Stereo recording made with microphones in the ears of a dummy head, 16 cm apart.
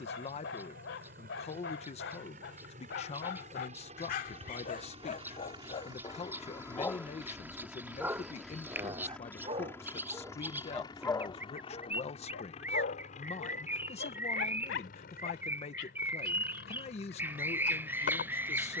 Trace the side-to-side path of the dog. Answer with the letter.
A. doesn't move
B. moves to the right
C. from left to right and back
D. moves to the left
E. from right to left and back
C.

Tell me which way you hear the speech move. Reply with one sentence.
You can hear the speech stay in one place.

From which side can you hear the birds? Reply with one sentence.
In this clip you hear the birds in the centre.